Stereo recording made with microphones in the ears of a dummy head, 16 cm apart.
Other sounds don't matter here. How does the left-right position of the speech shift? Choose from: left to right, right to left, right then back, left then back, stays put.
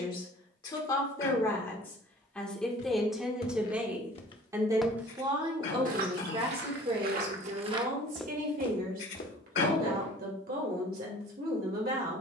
left to right.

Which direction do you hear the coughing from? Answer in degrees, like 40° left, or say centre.
60° left.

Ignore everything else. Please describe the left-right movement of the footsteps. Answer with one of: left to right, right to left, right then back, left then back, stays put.
right then back.